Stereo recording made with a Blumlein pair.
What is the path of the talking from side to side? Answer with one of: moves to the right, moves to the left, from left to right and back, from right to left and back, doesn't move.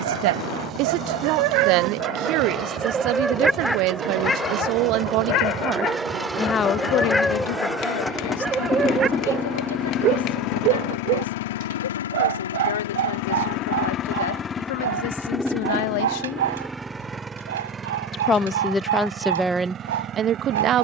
from right to left and back.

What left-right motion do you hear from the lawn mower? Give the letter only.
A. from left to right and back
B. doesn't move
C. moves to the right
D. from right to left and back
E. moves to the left
D.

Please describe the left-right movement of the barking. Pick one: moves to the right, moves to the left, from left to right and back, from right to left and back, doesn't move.
from right to left and back.